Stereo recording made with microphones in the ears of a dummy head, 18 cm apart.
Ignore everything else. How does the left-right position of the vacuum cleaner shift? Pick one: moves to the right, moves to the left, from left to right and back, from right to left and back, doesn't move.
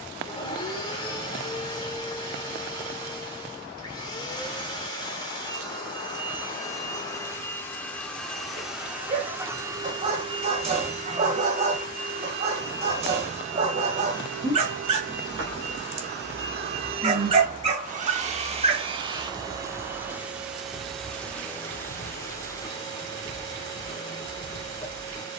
from left to right and back.